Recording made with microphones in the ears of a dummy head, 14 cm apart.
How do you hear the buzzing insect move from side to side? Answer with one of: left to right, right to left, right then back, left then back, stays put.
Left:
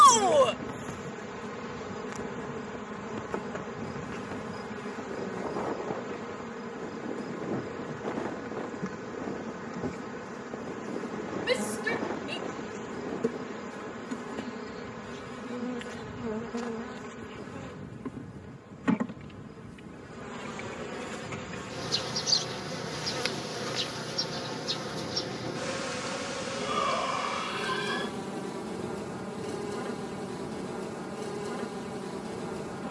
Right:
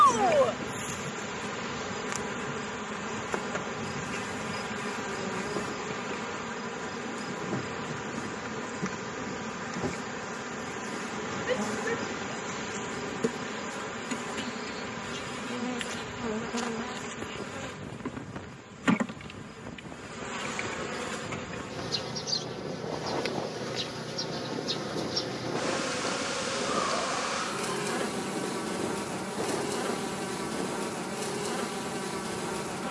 left then back.